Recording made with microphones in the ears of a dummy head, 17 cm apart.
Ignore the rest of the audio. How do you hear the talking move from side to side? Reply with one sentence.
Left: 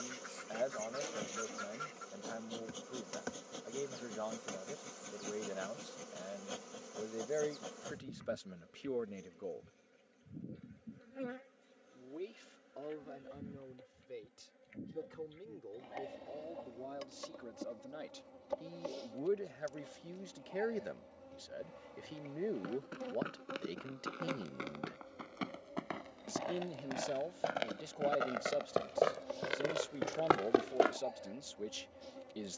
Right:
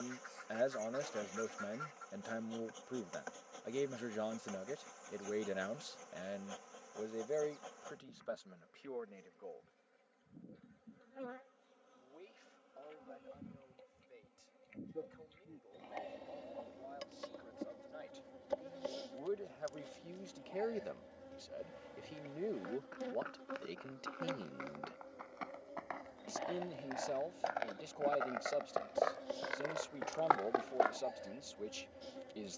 In this clip you hear the talking go left and come back.